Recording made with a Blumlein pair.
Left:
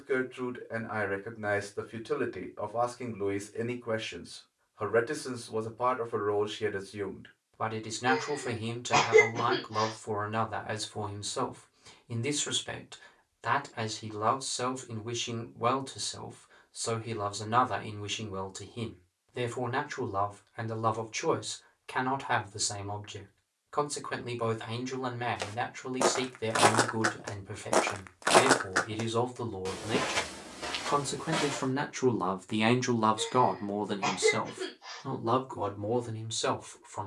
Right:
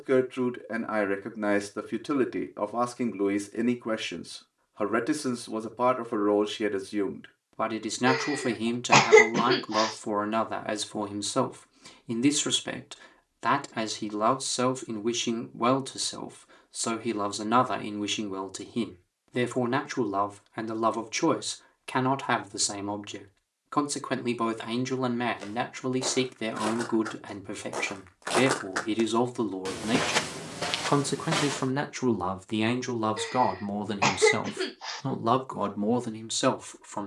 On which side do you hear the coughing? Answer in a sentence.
You can hear the coughing on the right.